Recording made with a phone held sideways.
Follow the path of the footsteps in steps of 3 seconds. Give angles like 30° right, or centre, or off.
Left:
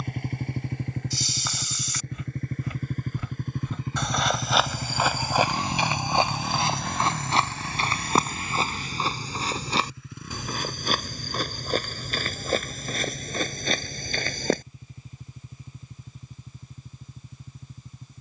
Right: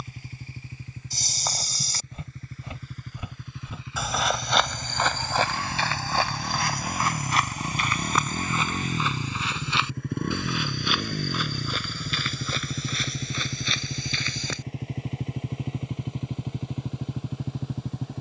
40° right, 10° left, 30° left, 40° left, 50° left, off.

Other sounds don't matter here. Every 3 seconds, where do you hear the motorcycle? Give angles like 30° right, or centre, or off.
60° left, 40° left, 20° right, 60° right, 80° right, 80° right.